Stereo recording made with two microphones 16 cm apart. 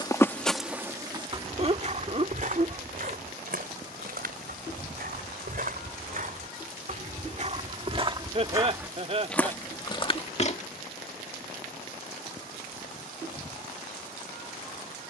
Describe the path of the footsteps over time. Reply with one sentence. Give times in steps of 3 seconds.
You can hear the footsteps on the right from 0 s, on the left from 9 s and not at all from 12 s.